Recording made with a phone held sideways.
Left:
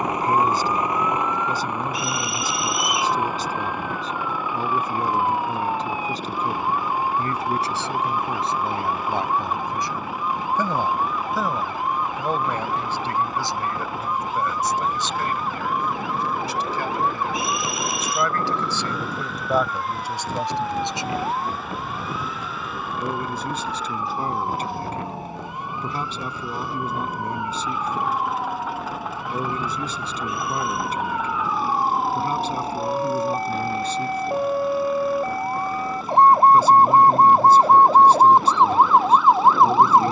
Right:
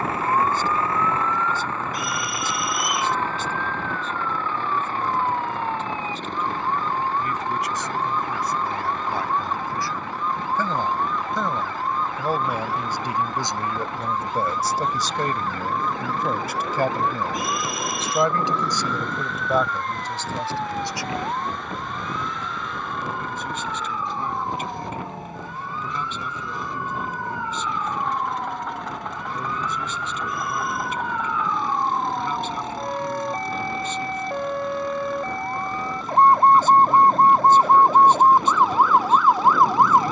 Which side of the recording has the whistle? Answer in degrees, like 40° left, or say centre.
50° right.